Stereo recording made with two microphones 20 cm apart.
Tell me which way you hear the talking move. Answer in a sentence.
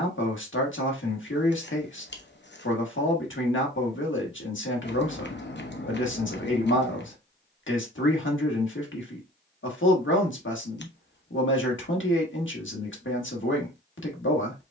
You can hear the talking stay in one place.